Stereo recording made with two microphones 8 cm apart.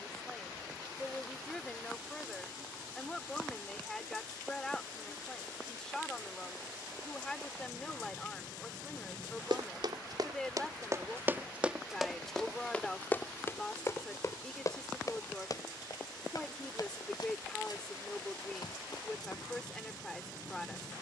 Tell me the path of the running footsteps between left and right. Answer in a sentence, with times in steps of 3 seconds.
You can hear the running footsteps not at all from 0 s, on the right from 9 s and on the left from 12 s.